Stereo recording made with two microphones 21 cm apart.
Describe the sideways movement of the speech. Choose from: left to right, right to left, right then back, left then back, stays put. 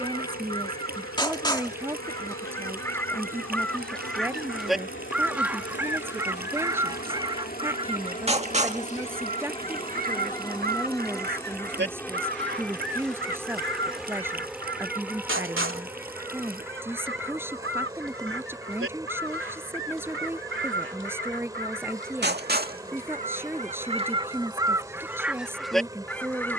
stays put.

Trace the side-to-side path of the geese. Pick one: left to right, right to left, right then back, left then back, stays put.
right then back.